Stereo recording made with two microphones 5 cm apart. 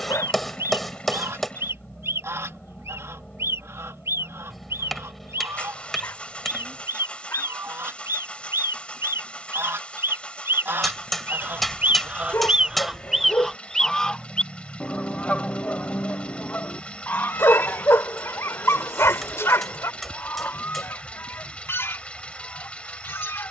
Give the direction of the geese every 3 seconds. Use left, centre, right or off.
right, right, right, right, centre, left, left, left.